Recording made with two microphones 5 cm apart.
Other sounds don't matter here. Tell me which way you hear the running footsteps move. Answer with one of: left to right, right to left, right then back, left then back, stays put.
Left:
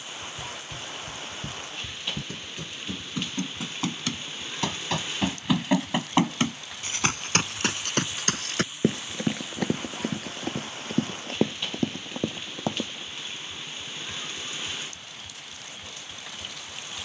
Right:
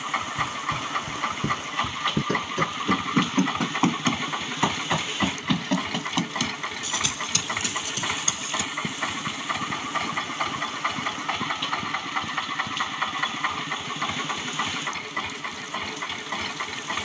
right to left.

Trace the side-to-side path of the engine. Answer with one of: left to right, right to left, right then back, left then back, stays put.
stays put.